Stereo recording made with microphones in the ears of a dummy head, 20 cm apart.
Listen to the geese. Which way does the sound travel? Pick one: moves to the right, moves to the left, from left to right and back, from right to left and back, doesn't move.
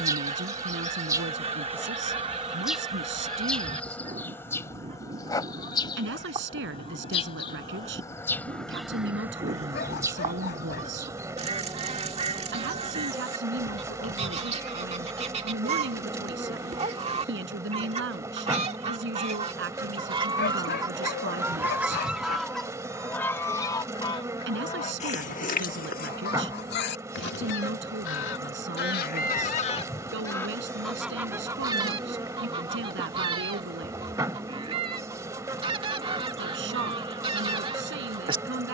from right to left and back.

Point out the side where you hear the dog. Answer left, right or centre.
left.